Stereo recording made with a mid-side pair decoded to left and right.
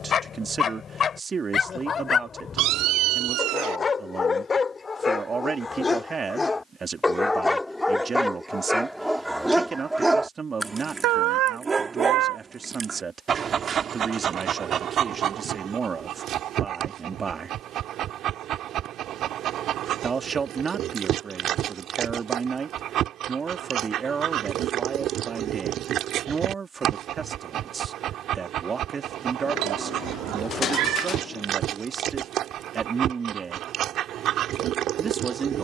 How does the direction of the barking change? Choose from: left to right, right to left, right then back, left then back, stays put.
left to right.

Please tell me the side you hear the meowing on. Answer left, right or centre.
right.